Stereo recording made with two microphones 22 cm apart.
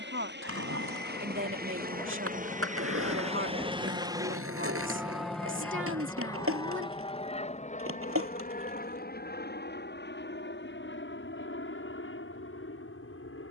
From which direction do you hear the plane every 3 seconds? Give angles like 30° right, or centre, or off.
50° right, 10° right, 30° left, 50° left, 60° left.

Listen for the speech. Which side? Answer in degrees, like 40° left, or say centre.
60° right.